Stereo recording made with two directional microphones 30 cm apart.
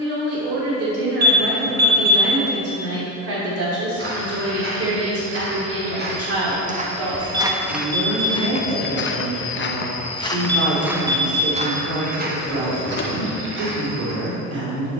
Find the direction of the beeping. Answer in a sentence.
In this clip you hear the beeping on the right.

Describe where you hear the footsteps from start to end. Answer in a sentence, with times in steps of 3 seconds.
In this clip you hear the footsteps not at all from 0 s, on the right from 3 s, in the centre from 6 s and on the right from 12 s.